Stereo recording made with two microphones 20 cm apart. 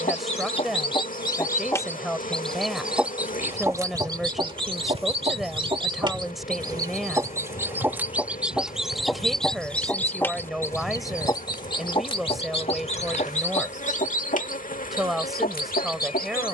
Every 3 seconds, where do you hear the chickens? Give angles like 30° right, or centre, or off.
20° left, 20° right, 10° right, 10° left, 30° left, 50° left.